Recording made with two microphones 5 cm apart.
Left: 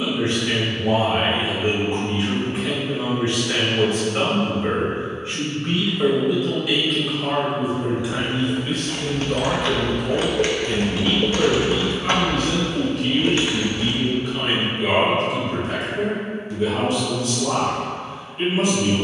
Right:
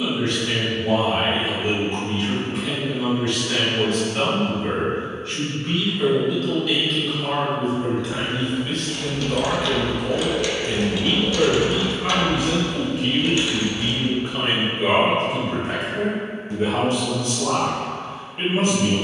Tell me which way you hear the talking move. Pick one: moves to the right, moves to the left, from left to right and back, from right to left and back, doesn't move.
moves to the right.